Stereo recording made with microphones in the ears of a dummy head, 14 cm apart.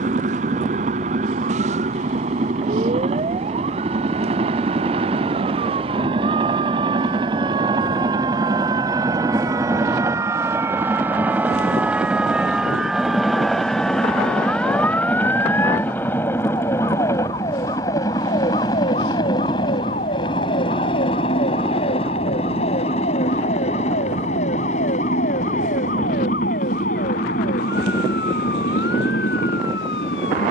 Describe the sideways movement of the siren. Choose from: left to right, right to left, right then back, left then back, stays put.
right to left.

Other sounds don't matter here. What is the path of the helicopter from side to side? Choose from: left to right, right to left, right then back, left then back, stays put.
right to left.